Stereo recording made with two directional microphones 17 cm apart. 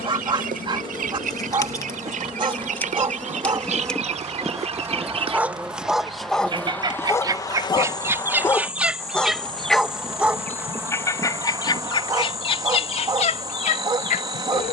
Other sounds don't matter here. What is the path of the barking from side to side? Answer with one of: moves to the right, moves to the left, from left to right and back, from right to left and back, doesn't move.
from right to left and back.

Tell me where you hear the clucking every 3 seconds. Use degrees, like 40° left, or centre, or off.
50° right, 40° right, 20° right, 10° left, 40° left.